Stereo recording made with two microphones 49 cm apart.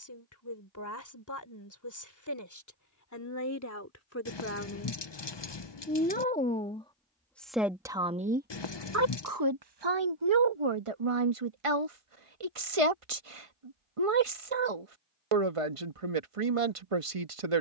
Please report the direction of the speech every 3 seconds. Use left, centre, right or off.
left, left, centre, right, right, right.